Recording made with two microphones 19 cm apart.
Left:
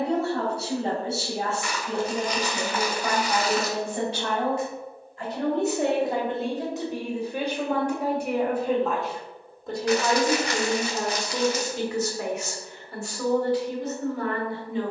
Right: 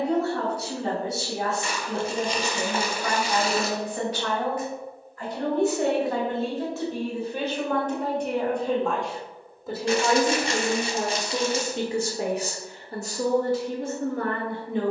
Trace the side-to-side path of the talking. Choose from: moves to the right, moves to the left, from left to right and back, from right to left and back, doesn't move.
moves to the right.